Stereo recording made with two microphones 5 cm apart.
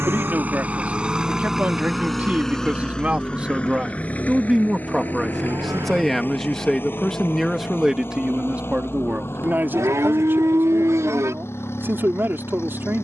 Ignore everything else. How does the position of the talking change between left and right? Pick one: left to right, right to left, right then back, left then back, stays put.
left then back.